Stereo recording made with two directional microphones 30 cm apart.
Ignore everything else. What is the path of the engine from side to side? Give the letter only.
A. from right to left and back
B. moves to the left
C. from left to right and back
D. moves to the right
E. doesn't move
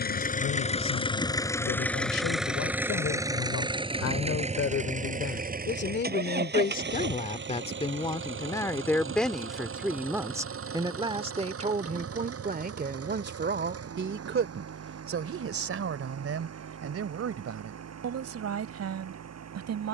D.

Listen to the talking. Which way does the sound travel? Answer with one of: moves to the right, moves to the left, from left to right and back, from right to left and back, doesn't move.
moves to the right.